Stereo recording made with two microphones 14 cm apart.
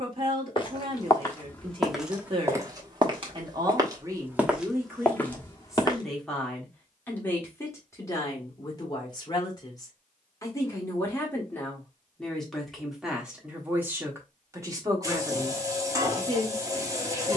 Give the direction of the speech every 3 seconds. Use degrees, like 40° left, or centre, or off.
40° right, 20° right, 20° left, 20° left, 10° right, 30° right.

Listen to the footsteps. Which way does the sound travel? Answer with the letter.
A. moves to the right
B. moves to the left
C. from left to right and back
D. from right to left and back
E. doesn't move
C.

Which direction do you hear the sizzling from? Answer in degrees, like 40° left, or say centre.
20° right.